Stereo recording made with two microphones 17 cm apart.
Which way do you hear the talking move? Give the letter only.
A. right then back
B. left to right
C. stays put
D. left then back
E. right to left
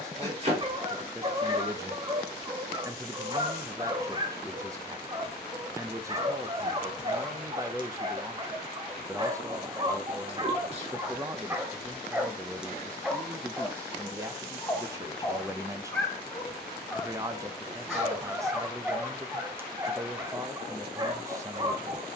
C.